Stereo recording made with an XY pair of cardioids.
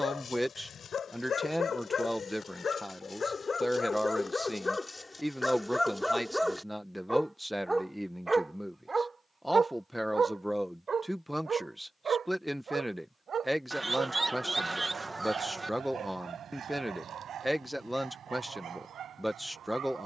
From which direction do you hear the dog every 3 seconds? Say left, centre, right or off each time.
left, left, centre, right, right, right, right.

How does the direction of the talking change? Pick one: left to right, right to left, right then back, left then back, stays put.
stays put.